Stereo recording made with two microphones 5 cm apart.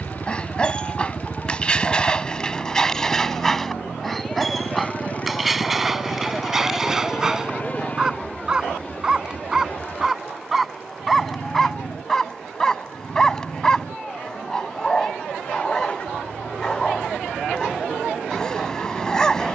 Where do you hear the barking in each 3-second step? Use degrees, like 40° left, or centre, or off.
20° left, centre, 10° right, centre, 10° left, 10° left, 10° left.